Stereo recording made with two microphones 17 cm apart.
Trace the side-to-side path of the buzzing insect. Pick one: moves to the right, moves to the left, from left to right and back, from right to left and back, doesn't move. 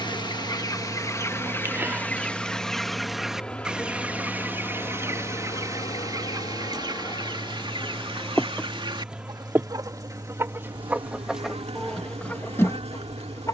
from right to left and back.